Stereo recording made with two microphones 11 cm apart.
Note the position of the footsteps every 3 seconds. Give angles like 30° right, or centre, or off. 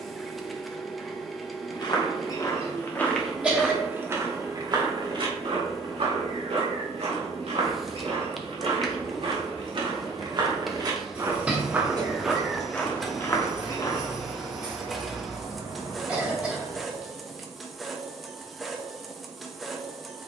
30° left, 30° right, 70° right, 40° right, 20° left, off, off.